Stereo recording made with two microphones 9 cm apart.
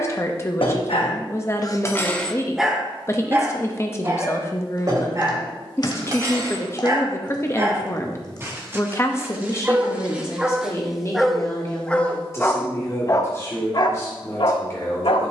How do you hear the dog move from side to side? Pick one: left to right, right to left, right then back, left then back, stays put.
right then back.